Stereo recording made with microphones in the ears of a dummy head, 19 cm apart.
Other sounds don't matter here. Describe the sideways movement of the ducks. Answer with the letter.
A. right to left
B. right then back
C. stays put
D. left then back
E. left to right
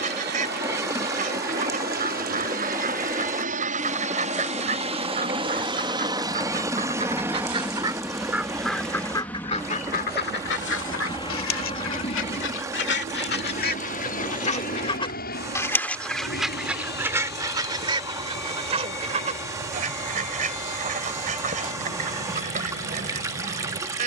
D.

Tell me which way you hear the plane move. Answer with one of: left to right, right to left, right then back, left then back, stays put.
right to left.